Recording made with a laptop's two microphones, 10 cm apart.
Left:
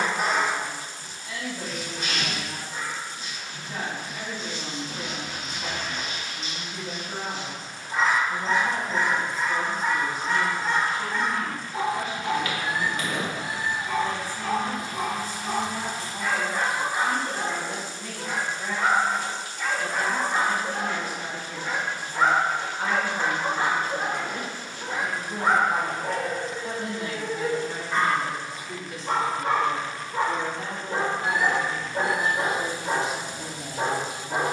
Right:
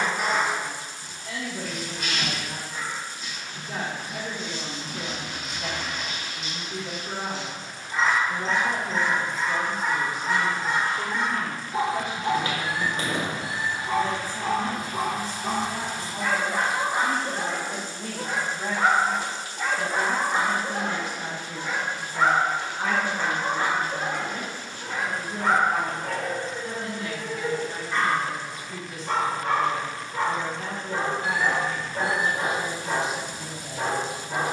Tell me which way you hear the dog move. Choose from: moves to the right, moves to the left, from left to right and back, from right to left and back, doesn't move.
from left to right and back.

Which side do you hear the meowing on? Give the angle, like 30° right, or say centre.
50° left.